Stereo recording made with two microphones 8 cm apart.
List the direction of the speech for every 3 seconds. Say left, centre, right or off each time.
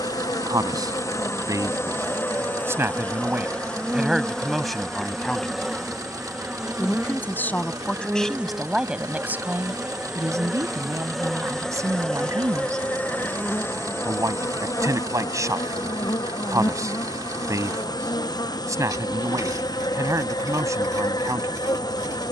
right, centre, centre, right, right, right, right, right.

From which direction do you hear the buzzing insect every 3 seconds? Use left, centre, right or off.
left, centre, centre, centre, left, left, left, left.